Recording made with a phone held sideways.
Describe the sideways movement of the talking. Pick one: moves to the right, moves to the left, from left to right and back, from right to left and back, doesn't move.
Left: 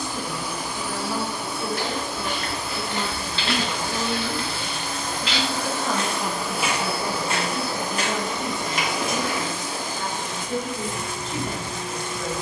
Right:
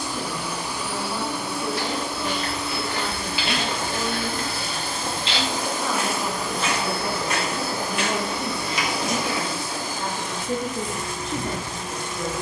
moves to the right.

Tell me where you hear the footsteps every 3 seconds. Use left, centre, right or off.
left, right, left, left.